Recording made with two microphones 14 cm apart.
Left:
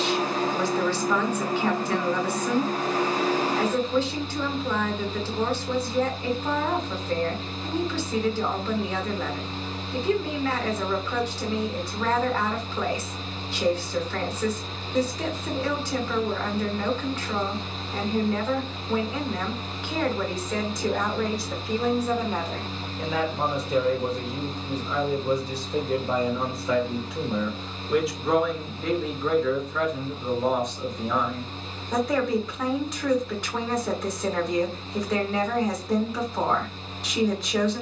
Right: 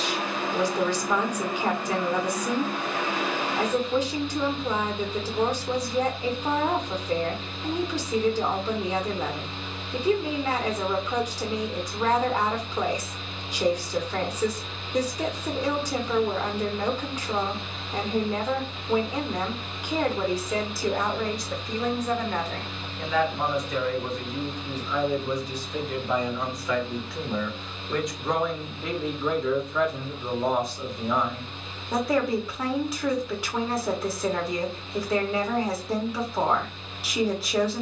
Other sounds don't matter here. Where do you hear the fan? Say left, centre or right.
left.